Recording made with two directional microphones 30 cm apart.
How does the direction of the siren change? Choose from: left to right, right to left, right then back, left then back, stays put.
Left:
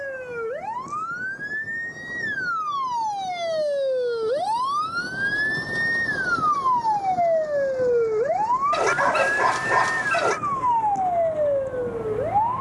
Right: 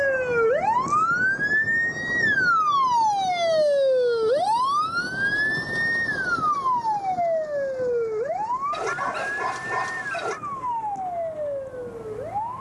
right to left.